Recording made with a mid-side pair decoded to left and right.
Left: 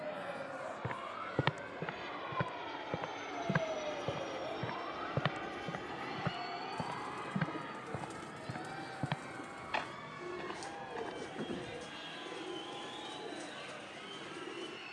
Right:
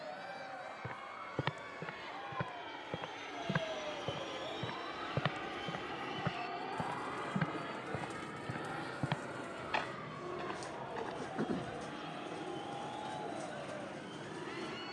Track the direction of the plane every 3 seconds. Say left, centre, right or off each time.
left, centre, right, right, right.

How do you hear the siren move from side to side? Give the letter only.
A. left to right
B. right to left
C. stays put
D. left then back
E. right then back
A.